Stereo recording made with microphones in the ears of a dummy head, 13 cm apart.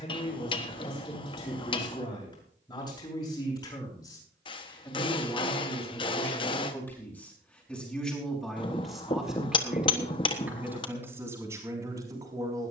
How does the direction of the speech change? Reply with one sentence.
In this clip you hear the speech move to the right.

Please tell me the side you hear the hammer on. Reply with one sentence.
You can hear the hammer on the left.